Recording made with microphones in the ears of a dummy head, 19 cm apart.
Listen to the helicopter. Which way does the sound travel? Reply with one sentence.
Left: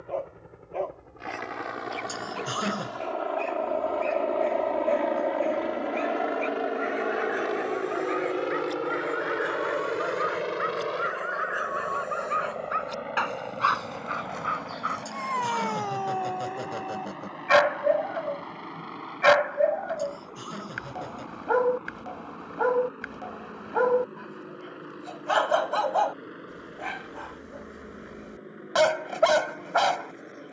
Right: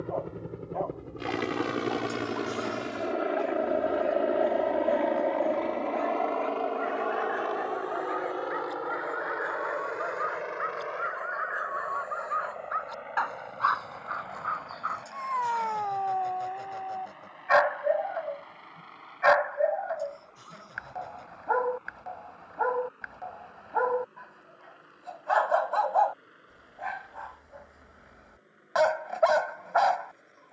You can hear the helicopter move to the left.